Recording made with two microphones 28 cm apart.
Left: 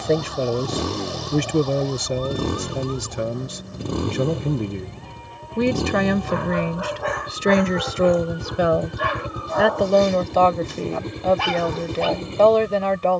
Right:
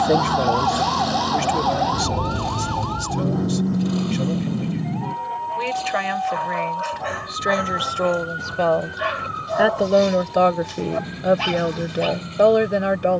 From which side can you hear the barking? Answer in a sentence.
In this clip you hear the barking on the left.